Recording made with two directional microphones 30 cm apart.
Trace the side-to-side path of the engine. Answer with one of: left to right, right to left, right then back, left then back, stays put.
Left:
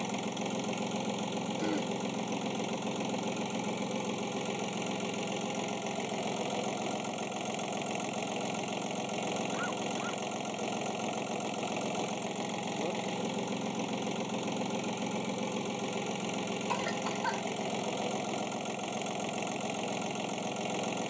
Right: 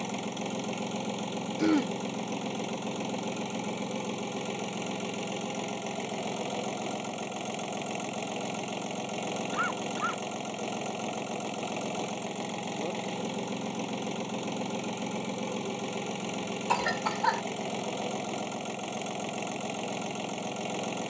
stays put.